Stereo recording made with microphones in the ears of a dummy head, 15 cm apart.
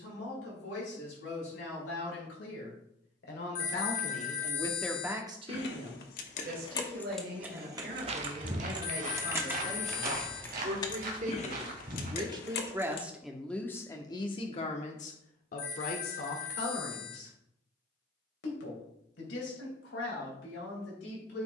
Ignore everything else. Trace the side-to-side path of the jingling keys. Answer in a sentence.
You can hear the jingling keys move from left to right and back again.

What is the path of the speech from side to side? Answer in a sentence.
In this clip you hear the speech go right and come back.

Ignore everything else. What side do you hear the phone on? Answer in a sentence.
You can hear the phone on the left.